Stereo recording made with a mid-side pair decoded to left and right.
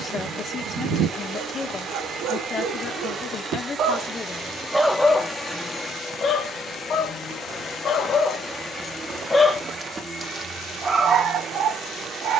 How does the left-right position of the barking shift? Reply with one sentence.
In this clip you hear the barking go left and come back.